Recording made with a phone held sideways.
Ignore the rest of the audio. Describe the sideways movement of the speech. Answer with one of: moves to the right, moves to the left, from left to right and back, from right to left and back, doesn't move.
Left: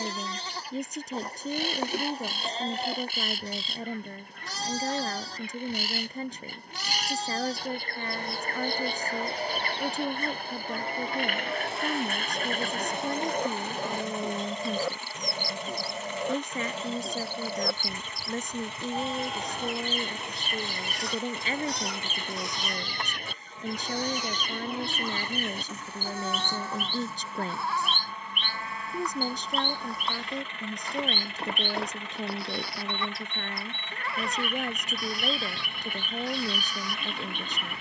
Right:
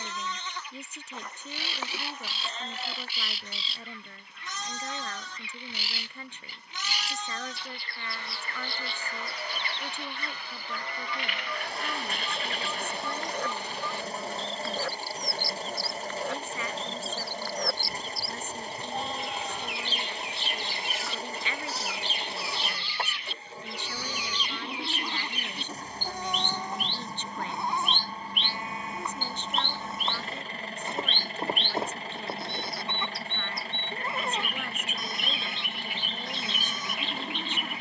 doesn't move.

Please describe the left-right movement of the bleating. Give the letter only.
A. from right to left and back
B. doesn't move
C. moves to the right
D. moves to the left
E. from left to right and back
C.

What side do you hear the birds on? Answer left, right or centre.
left.